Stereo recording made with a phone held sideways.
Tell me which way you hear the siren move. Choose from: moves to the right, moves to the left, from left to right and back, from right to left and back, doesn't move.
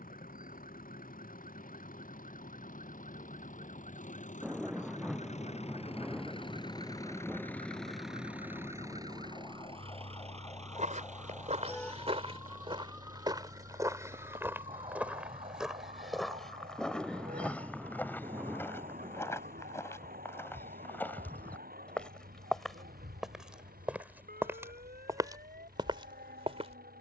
moves to the right.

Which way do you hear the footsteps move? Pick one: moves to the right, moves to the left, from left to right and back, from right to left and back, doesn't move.
from right to left and back.